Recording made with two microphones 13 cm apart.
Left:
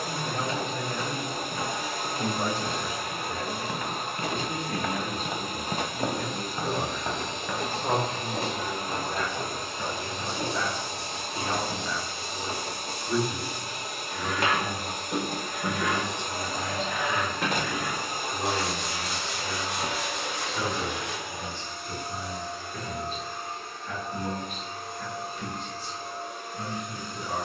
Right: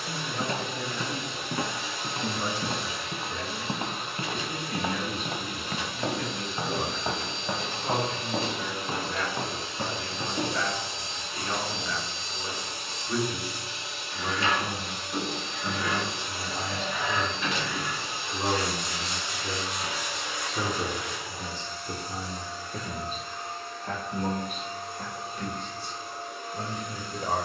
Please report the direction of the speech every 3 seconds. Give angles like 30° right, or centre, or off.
50° left, 40° left, 40° left, 20° left, 10° left, 10° right, 30° right, 40° right, 50° right.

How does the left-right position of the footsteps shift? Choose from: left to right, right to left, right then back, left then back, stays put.
left then back.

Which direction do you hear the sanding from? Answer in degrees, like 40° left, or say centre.
70° left.